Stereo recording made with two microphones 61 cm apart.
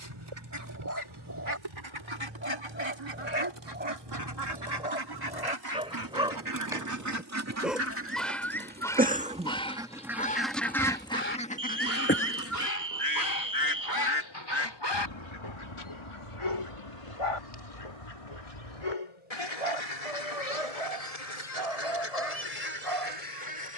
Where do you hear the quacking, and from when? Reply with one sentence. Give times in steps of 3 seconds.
You can hear the quacking on the right from 0 s, in the centre from 9 s and on the left from 12 s.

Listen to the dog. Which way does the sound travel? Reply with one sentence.
You can hear the dog move from right to left.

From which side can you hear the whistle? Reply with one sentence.
In this clip you hear the whistle on the right.